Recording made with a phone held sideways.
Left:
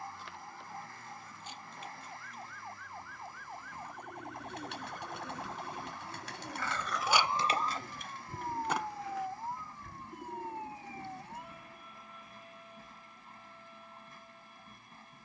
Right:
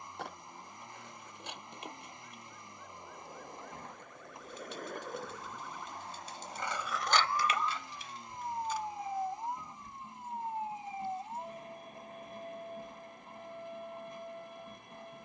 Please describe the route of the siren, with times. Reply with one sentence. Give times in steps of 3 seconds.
In this clip you hear the siren on the left from 0 s, in the centre from 6 s and on the right from 9 s.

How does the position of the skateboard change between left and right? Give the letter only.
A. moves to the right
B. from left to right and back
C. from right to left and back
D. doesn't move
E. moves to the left
E.